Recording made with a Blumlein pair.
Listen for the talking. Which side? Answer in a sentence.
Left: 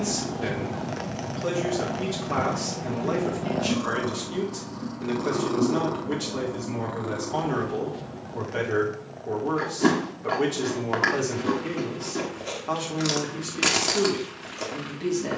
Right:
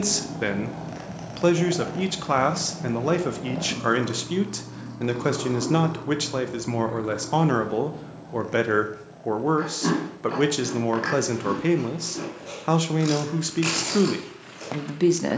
In this clip you hear the talking on the right.